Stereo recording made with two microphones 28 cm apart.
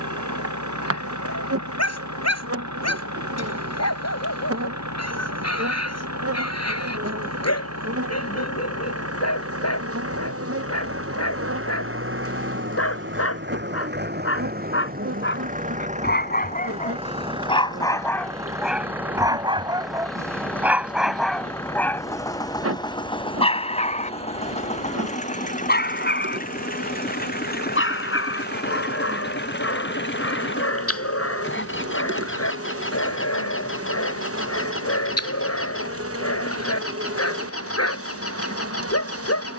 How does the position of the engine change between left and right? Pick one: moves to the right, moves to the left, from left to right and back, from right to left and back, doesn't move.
moves to the left.